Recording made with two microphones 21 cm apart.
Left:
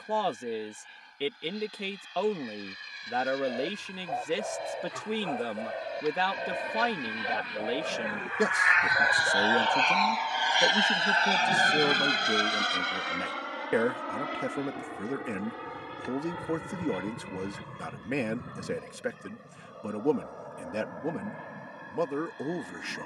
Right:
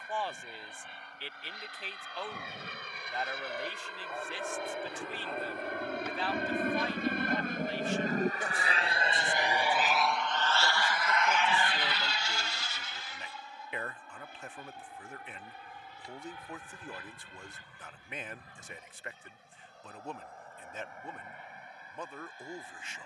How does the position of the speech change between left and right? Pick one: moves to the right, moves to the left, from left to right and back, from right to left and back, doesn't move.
doesn't move.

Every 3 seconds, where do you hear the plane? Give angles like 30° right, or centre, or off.
80° right, 70° right, 50° right, 10° left, 60° left, 70° left, 80° left, 80° left.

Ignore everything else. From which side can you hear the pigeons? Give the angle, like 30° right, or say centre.
70° left.